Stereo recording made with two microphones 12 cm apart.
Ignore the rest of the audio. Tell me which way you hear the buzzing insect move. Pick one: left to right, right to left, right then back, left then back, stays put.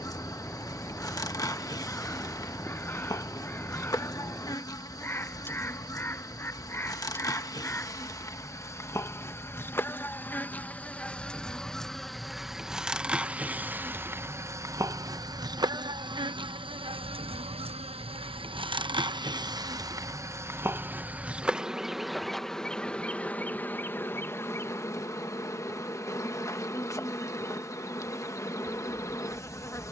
right then back.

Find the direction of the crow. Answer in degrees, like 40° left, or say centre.
20° left.